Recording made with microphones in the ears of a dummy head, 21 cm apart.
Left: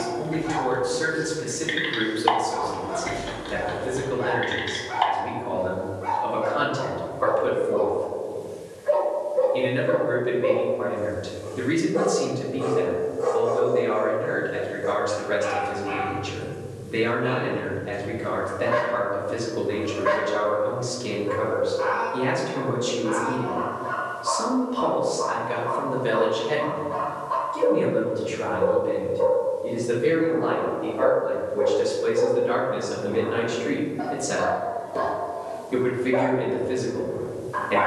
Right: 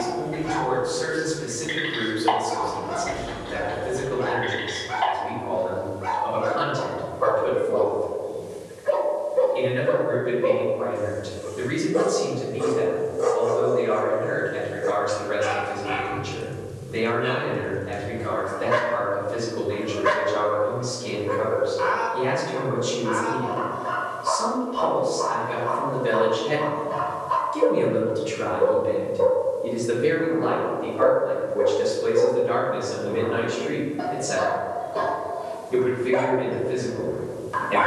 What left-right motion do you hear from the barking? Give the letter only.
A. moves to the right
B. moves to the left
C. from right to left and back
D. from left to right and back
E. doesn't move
E.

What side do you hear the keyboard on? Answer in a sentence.
You can hear the keyboard on the left.